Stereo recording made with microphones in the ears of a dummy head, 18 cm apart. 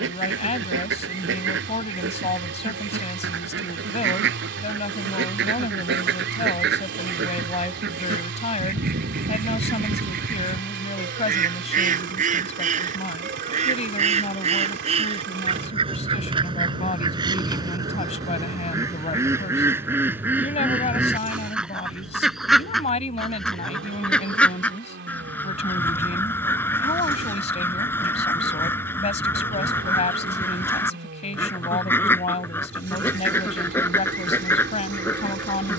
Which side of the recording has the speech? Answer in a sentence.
You can hear the speech on the left.